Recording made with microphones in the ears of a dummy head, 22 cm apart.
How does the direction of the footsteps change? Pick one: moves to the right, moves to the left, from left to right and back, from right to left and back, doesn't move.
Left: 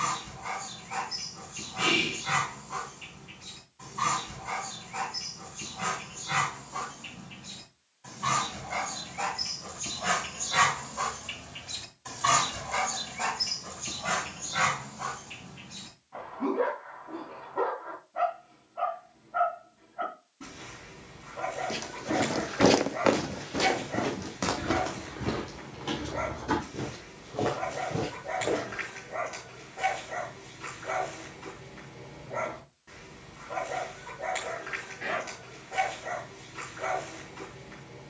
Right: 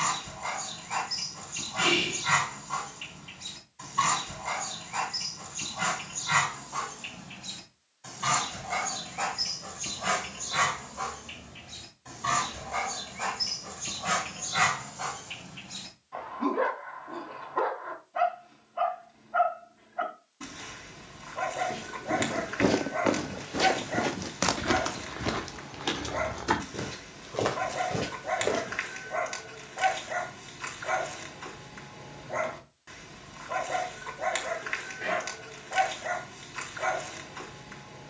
moves to the right.